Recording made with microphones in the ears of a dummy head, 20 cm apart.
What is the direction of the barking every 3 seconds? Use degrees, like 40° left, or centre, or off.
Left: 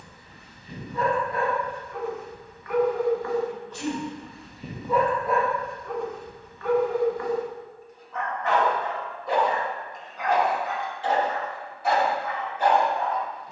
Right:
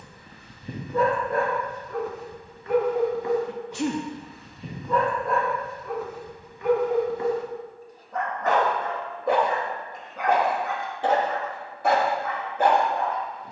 40° right, centre, 20° right, 50° right, 50° right.